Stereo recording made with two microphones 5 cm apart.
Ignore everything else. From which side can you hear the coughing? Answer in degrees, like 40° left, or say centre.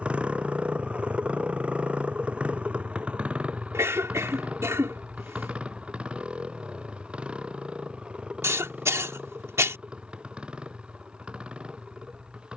80° right.